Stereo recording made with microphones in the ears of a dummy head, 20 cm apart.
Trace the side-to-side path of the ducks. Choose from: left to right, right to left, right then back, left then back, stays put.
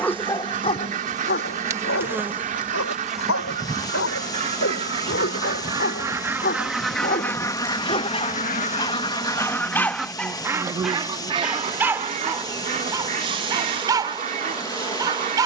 left then back.